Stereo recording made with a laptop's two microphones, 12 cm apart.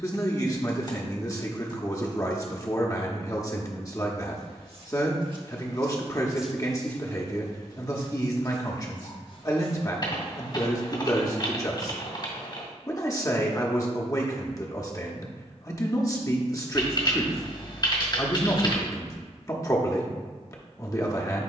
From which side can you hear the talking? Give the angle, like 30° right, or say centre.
30° left.